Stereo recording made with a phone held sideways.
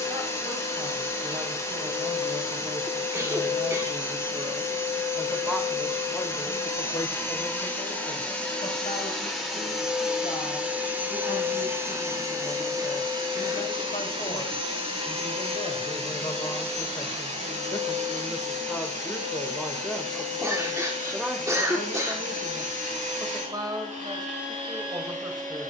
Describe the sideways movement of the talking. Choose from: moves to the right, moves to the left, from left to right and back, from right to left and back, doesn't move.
from right to left and back.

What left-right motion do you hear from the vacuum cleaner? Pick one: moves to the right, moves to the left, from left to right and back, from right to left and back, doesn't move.
moves to the right.